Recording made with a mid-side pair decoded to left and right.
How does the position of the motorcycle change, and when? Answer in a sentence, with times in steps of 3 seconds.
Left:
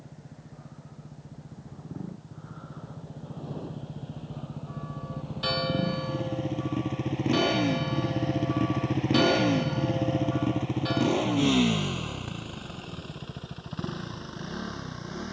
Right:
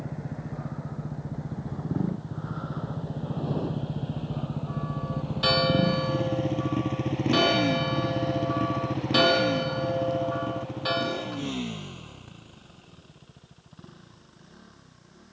In this clip you hear the motorcycle on the right from 0 s, in the centre from 6 s and on the left from 9 s.